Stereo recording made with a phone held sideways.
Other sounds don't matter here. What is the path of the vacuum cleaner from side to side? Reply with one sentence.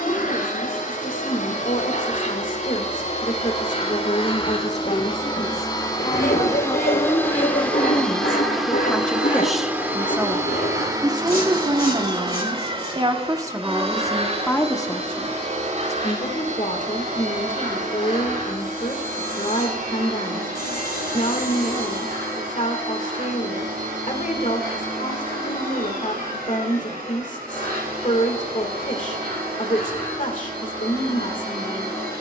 In this clip you hear the vacuum cleaner move from left to right.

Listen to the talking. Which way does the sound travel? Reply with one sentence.
In this clip you hear the talking move from left to right and back again.